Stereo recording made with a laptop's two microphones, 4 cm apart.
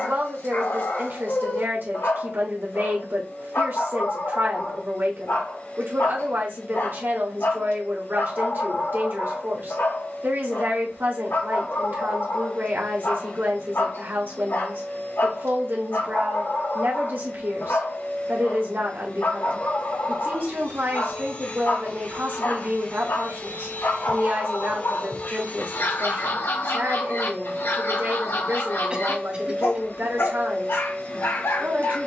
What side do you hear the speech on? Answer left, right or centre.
right.